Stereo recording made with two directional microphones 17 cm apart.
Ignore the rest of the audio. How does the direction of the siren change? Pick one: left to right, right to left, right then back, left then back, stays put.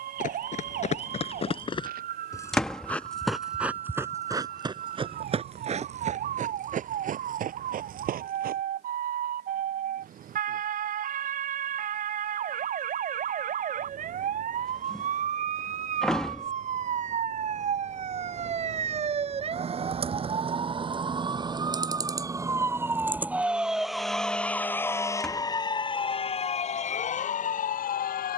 right to left.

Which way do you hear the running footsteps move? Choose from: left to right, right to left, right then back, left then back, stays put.
left to right.